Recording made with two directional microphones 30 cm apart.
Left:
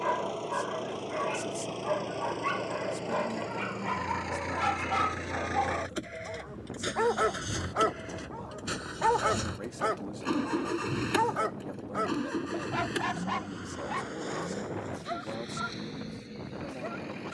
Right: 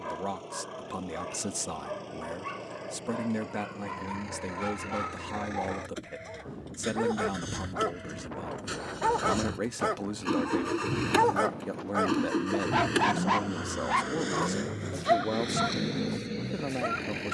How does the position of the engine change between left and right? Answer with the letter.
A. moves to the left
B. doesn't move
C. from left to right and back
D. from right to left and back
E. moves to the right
E.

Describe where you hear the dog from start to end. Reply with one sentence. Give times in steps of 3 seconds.
In this clip you hear the dog on the left from 0 s, in the centre from 9 s and on the right from 12 s.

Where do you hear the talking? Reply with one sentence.
You can hear the talking on the right.